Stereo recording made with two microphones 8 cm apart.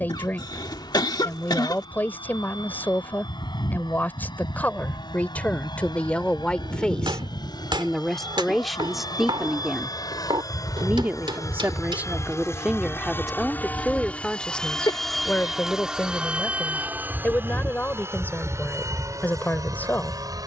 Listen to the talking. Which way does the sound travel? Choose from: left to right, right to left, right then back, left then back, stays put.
right then back.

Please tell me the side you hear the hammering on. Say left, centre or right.
right.